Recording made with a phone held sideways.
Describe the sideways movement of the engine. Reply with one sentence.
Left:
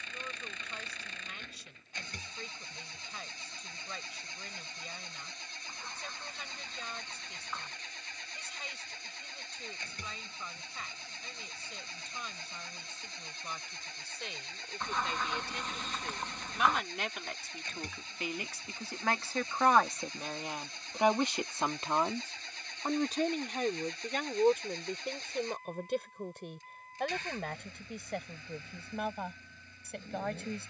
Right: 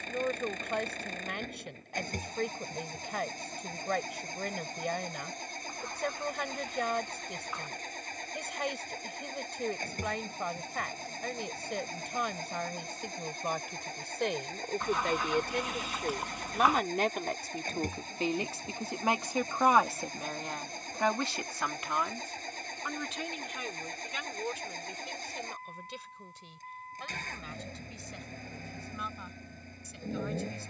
You can hear the engine stay in one place.